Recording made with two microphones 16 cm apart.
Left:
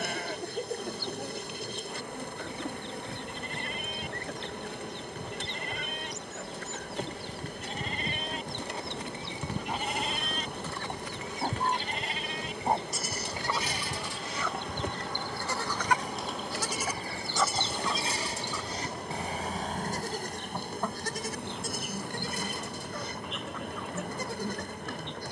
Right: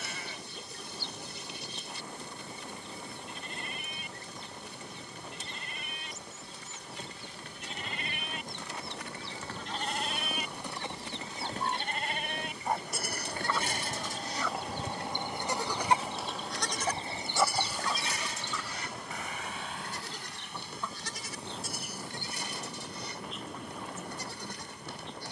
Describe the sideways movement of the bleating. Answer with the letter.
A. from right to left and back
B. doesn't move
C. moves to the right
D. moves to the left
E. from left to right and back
E.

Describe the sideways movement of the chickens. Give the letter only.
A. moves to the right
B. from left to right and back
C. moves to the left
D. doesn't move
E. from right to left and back
B.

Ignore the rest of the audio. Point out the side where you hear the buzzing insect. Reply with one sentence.
In this clip you hear the buzzing insect on the left.